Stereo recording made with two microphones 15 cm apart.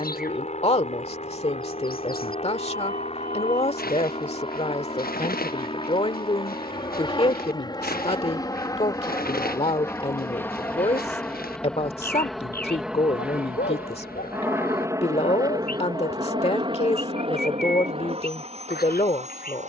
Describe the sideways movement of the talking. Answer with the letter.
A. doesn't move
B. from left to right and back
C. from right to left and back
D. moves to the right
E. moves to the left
A.